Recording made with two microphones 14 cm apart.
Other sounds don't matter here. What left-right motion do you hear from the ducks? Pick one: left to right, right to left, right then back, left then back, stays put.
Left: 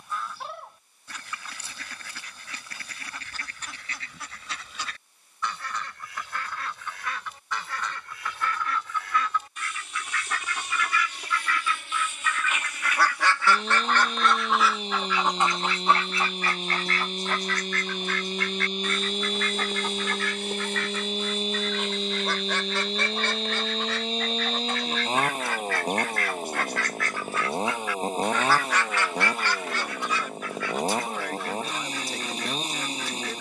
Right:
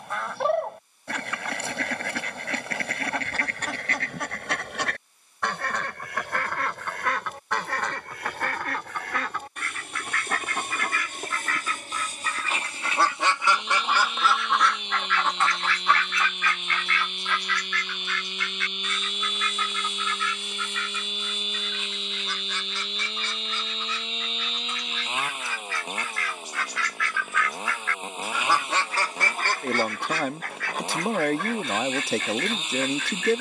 left then back.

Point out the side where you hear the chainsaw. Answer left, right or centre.
left.